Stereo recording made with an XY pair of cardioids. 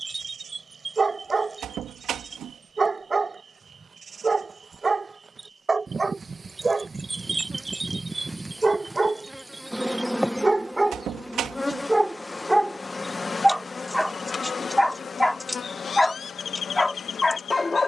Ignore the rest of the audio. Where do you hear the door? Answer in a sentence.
In this clip you hear the door on the right.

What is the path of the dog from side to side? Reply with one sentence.
In this clip you hear the dog go from the right side to the left.